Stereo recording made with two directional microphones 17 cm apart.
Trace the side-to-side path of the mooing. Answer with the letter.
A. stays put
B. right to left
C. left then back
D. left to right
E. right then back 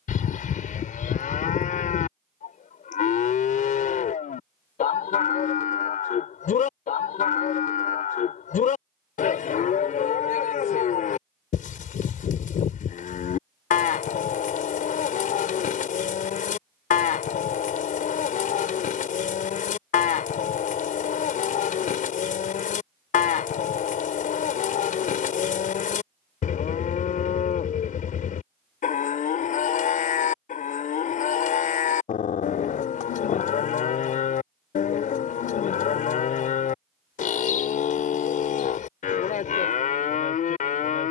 A.